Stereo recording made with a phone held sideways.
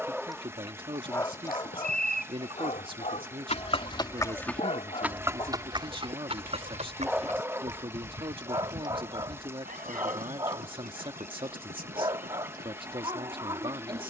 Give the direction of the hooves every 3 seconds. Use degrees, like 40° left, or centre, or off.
70° left, centre, 50° right, 60° right, 70° right.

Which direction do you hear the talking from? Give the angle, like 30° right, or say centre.
30° right.